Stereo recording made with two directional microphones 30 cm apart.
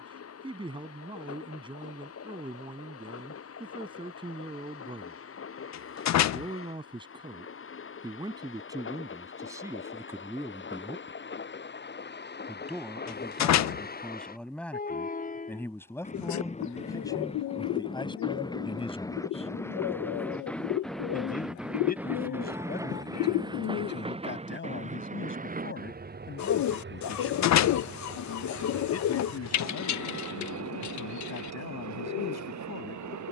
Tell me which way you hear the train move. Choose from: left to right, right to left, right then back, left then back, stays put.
left to right.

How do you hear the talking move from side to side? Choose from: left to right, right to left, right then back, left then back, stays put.
right to left.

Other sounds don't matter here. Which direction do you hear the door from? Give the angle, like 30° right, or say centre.
60° left.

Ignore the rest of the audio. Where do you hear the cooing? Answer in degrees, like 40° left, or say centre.
60° left.